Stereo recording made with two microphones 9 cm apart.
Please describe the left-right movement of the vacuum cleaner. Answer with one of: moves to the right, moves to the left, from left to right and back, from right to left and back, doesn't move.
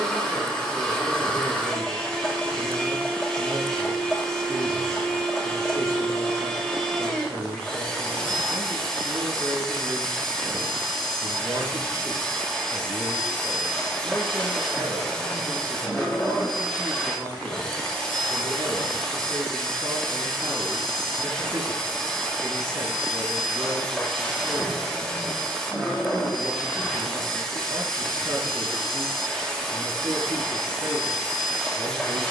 doesn't move.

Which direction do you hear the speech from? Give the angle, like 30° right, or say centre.
40° right.